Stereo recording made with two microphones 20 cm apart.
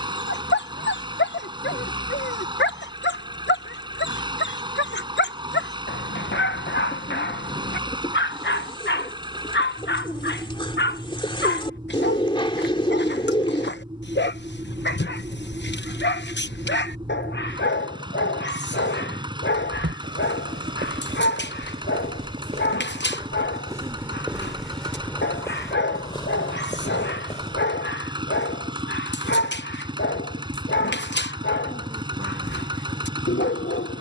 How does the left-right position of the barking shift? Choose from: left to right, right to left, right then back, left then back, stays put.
stays put.